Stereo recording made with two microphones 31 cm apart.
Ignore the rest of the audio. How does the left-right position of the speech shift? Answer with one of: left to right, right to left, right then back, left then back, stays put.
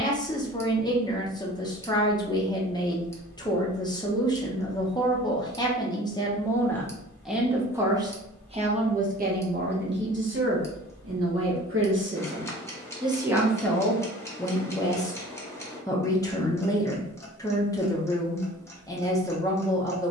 right then back.